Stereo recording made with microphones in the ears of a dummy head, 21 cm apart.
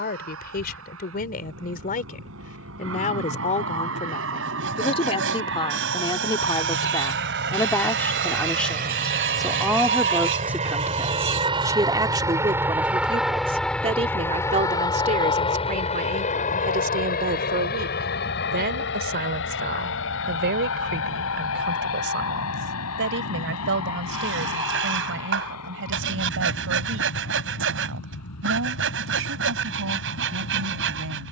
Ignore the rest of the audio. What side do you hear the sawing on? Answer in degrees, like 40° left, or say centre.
60° right.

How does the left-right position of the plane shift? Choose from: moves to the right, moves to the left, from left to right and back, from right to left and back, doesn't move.
moves to the left.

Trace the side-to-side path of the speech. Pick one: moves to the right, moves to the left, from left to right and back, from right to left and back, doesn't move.
moves to the right.